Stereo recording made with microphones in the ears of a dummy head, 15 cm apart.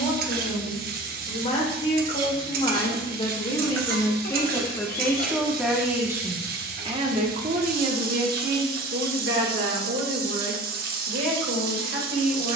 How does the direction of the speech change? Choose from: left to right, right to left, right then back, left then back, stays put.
left to right.